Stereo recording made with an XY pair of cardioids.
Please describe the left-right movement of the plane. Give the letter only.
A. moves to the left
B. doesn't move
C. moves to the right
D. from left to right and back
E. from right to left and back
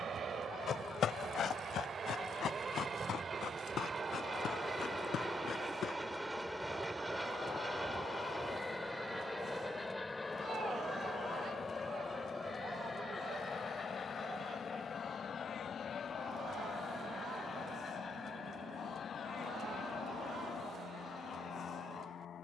A.